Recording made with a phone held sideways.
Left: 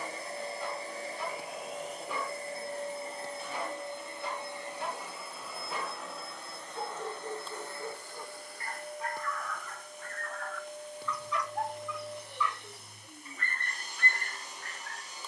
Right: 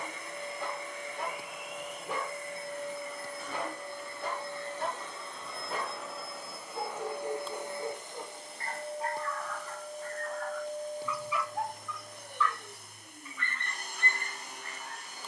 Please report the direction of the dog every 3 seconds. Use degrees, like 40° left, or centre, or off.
50° right, 50° right, 40° right, 20° right, 40° left.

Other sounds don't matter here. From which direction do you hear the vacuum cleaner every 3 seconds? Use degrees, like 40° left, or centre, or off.
30° left, 20° left, 20° right, 40° right, 50° right.